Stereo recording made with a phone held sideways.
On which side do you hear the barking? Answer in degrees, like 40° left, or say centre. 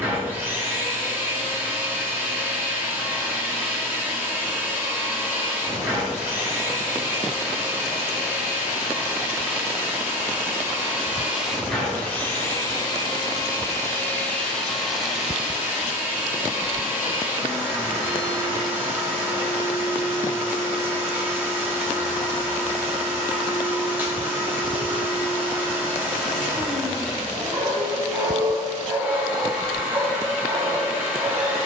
30° right.